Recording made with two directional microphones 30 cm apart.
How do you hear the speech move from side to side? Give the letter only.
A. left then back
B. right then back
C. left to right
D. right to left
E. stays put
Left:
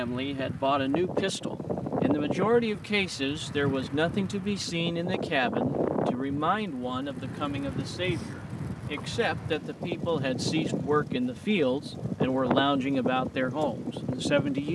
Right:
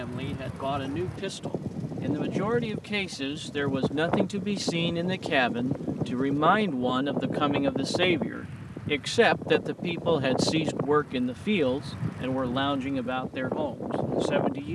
B.